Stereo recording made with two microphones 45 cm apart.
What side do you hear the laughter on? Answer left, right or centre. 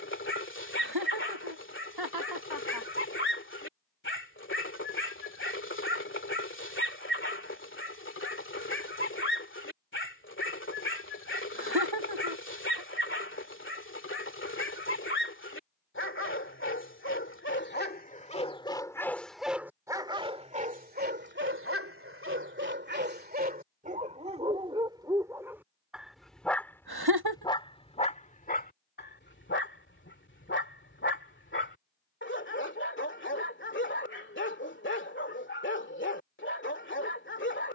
right.